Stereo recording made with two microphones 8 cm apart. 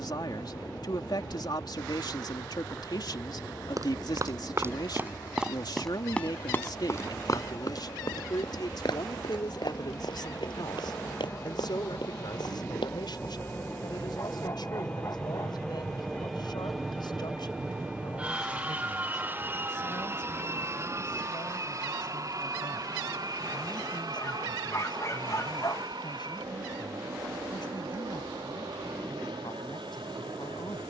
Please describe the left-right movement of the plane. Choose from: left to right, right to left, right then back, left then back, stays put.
left to right.